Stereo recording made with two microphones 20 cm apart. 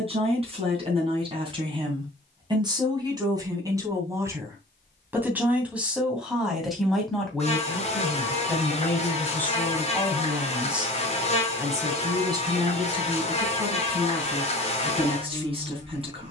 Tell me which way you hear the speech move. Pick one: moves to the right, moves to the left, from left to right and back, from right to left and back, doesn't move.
from right to left and back.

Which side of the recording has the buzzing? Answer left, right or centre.
left.